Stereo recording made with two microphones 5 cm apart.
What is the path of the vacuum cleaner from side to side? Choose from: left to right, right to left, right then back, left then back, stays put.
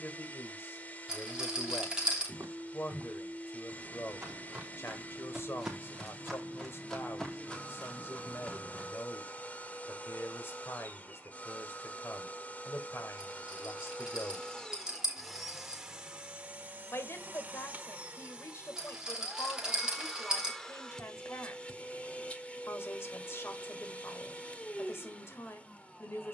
right then back.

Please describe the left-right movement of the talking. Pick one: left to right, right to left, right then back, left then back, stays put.
stays put.